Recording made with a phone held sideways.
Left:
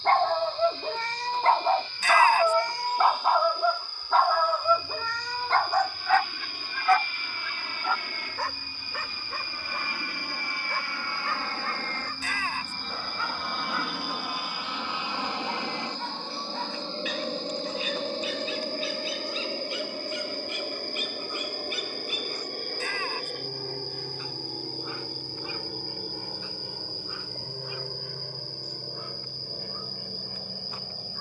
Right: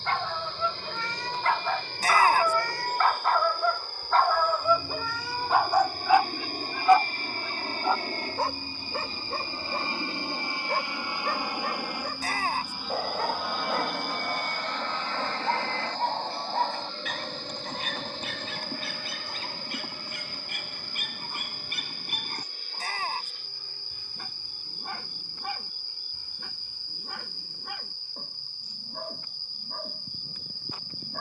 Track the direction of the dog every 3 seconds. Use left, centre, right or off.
left, centre, right, right, right, right, right, right, right, right, right.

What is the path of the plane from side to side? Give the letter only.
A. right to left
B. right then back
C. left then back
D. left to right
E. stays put
A.